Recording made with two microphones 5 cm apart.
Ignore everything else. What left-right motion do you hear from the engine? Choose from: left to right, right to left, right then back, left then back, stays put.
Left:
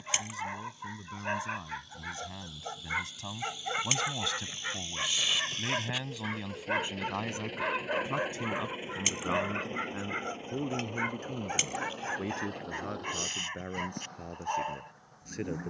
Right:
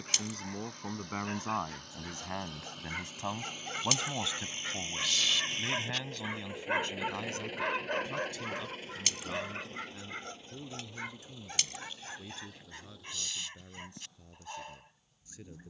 right to left.